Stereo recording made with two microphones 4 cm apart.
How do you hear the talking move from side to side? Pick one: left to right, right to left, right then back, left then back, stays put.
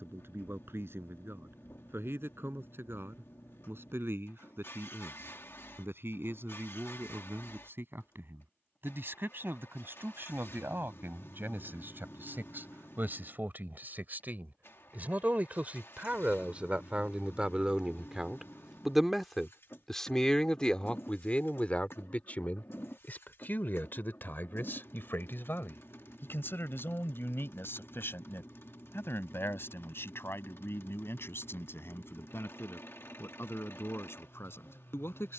right to left.